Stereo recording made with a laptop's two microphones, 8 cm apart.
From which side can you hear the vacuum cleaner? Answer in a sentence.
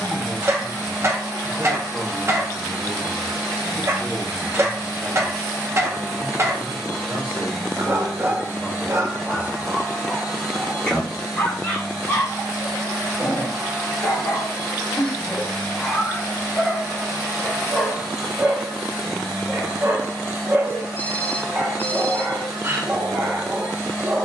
In this clip you hear the vacuum cleaner in the centre.